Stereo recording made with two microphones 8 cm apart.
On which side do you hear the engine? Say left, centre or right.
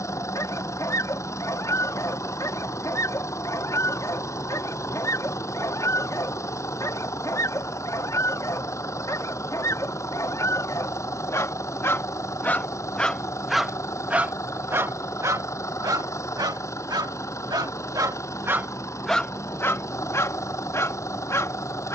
left.